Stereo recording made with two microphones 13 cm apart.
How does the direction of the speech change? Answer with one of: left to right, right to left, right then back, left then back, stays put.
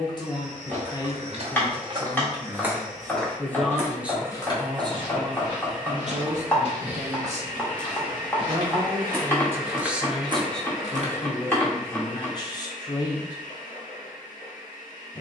right then back.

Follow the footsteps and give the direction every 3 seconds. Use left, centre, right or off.
right, left, left, right, off.